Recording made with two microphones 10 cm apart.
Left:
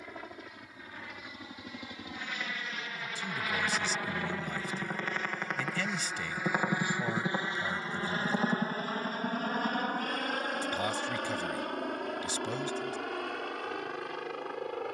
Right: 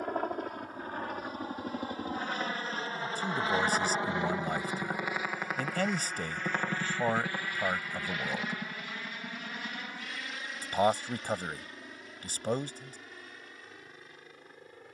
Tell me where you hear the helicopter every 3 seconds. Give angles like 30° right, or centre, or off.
40° right, 20° right, 20° left, 50° left, 70° left.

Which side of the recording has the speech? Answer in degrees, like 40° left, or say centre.
50° right.